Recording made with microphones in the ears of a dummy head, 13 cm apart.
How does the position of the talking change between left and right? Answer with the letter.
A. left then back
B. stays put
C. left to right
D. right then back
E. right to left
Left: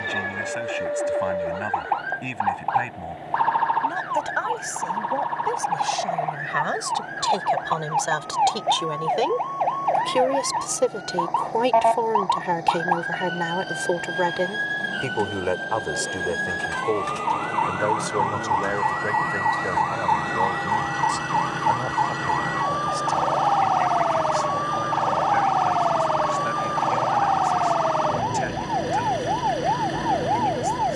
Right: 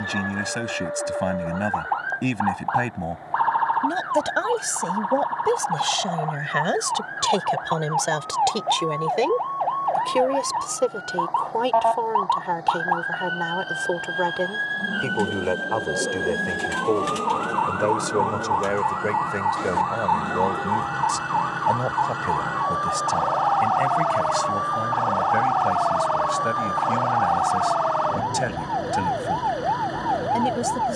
A.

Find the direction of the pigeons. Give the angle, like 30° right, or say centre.
30° right.